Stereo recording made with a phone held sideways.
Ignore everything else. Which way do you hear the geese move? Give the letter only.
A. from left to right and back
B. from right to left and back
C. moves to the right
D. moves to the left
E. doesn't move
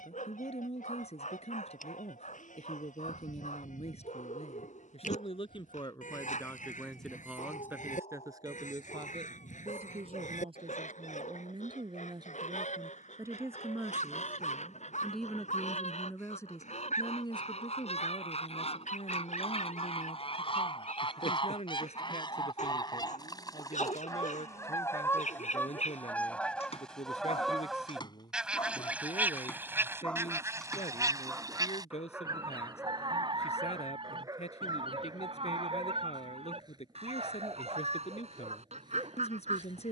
C.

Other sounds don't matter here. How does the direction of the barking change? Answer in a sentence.
In this clip you hear the barking move to the right.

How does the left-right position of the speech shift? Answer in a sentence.
In this clip you hear the speech move from left to right and back again.